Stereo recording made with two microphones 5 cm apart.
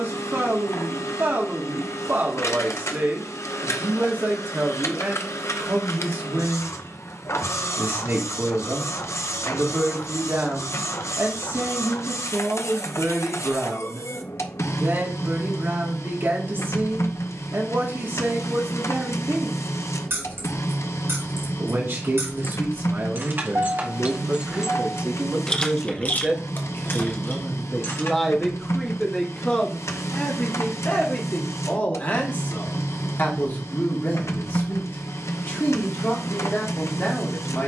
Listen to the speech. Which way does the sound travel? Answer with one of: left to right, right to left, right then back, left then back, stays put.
right to left.